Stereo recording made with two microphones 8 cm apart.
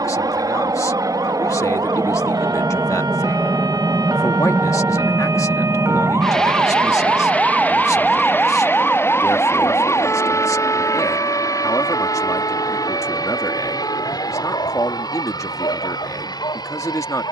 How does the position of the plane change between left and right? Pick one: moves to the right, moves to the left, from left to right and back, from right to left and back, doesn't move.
moves to the left.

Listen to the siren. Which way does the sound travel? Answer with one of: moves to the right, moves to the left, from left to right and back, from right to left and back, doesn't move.
moves to the left.